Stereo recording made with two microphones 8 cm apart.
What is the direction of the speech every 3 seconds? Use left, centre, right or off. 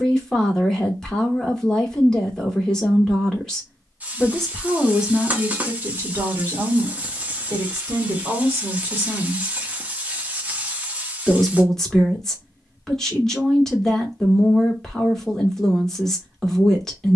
centre, centre, right, centre, centre, centre.